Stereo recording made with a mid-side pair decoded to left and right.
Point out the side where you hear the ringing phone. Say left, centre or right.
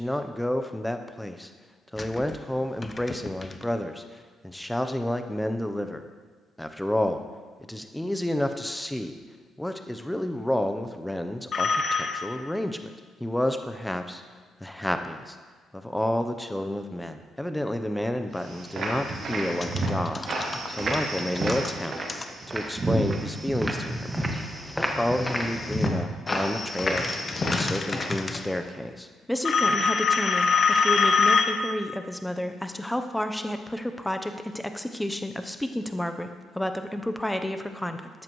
left.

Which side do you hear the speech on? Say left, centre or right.
centre.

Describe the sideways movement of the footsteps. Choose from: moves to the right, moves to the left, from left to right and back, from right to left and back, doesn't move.
moves to the left.